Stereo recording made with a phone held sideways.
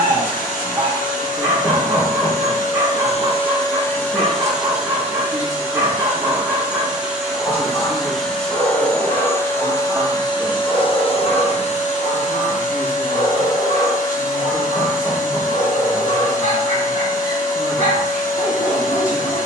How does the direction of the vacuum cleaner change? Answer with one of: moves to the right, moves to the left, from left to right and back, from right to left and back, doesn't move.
from left to right and back.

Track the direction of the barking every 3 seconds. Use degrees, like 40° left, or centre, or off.
20° right, 20° right, 10° left, 40° left, 50° left, 50° left, 50° left.